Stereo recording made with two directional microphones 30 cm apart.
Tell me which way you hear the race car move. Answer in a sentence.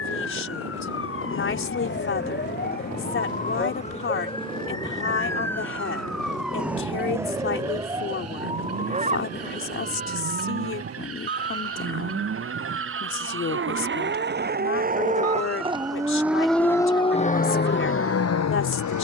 In this clip you hear the race car travel towards the left.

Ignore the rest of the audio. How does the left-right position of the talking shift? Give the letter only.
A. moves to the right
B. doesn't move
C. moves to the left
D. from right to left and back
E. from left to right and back
B.